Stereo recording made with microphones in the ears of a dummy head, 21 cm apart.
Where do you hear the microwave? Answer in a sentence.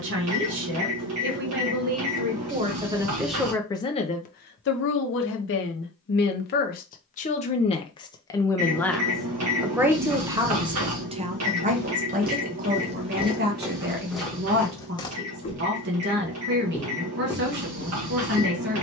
In this clip you hear the microwave on the right.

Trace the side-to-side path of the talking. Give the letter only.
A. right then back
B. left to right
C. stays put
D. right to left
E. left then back
E.